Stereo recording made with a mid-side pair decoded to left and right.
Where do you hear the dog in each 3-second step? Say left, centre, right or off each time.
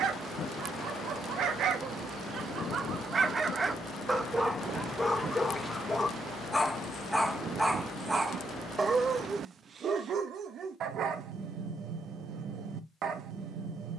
right, centre, centre, right, right.